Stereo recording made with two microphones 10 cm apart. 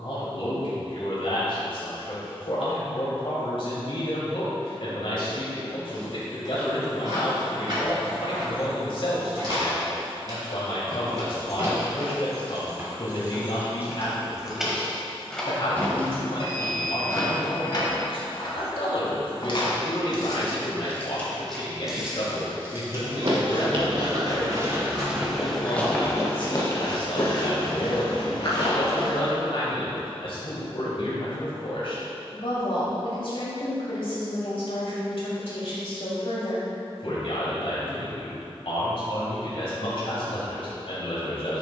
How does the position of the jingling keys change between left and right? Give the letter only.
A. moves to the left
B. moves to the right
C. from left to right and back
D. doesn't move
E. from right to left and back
E.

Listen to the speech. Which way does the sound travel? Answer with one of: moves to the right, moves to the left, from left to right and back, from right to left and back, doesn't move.
doesn't move.